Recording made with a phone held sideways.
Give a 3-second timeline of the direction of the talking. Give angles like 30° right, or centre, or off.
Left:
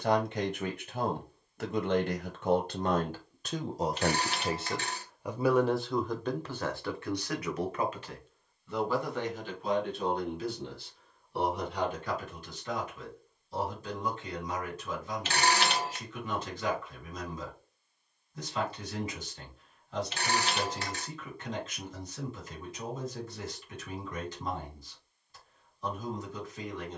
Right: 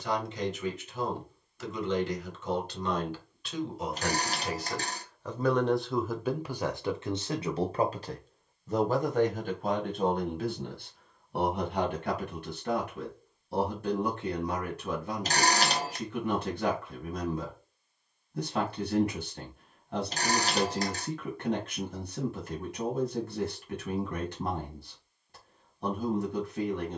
50° left, 30° left, 30° right, 50° right, 60° right, 60° right, 60° right, 60° right, 60° right.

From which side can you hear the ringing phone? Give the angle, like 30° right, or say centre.
40° right.